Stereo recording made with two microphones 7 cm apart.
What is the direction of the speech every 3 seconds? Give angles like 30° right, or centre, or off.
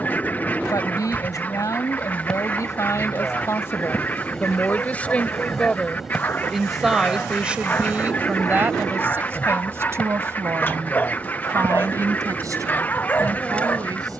50° left, 30° left, 20° right, 40° right, 50° right.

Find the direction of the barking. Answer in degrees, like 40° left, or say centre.
30° left.